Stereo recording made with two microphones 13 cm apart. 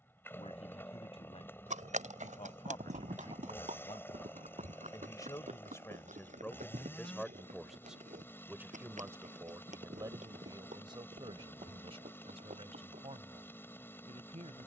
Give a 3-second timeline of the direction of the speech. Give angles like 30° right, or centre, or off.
50° left, 30° left, centre, 30° right, 50° right.